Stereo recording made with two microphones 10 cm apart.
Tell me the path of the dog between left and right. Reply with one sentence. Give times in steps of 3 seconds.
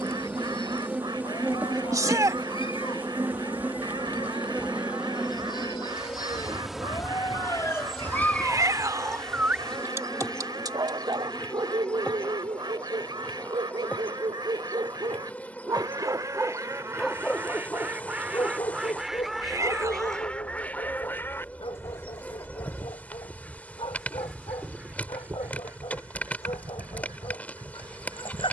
You can hear the dog on the left from 0 s, on the right from 9 s, in the centre from 15 s and on the left from 18 s.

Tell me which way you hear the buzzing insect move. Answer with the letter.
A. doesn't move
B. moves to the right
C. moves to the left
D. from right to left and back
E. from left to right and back
C.